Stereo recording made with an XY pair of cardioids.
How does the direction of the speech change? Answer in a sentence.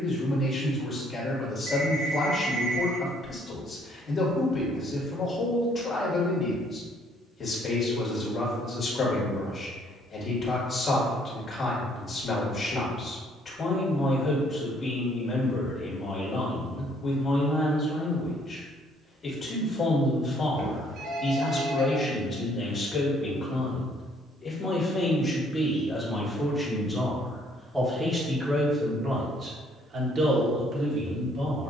You can hear the speech move from left to right.